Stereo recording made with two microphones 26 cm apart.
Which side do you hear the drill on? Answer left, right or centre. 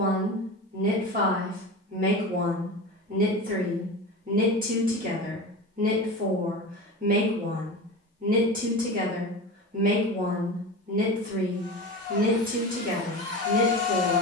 right.